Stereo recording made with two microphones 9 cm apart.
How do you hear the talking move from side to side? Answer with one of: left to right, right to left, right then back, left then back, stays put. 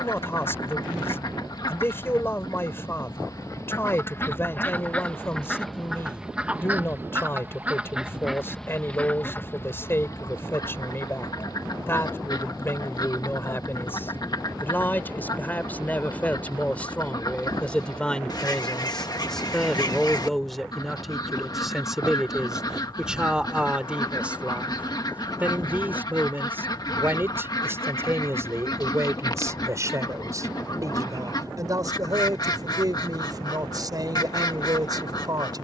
left to right.